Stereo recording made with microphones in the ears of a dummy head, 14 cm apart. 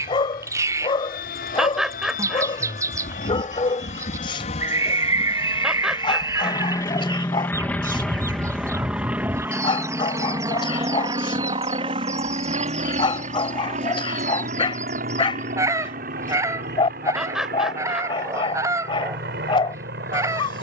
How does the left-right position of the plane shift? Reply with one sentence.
You can hear the plane go from the left side to the right.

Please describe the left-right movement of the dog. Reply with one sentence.
In this clip you hear the dog stay put.